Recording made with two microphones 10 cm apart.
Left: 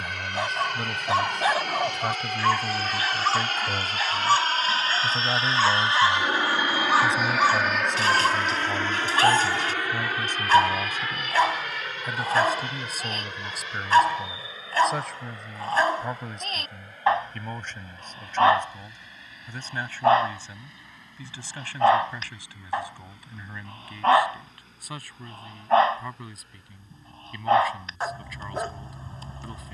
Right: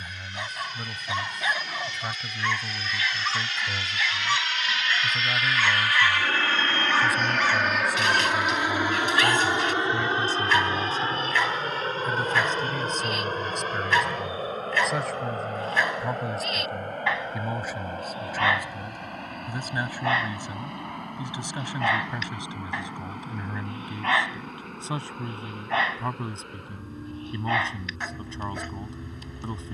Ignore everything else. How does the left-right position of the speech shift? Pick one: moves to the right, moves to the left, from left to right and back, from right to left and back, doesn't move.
moves to the right.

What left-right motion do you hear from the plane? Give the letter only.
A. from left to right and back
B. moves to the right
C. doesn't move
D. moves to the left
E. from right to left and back
B.